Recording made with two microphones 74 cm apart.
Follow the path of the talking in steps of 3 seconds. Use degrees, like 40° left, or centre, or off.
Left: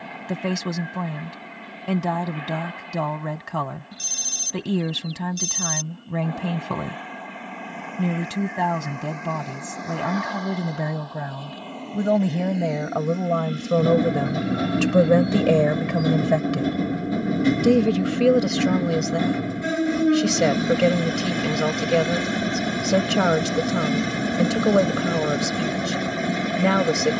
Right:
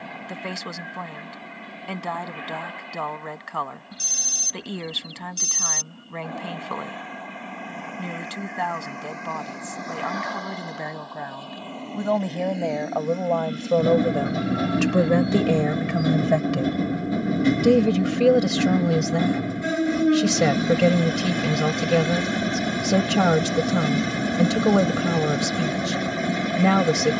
60° left, 60° left, 60° left, 60° left, 40° left, centre, 30° right, 30° right, 30° right.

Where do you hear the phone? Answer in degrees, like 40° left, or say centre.
10° left.